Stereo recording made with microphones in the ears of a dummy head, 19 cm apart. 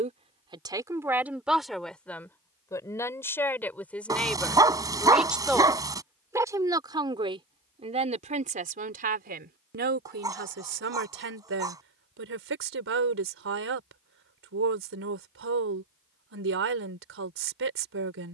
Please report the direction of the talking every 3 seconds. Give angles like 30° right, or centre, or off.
centre, centre, 30° right, 50° right, 60° right, 60° right.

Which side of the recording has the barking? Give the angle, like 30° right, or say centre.
20° right.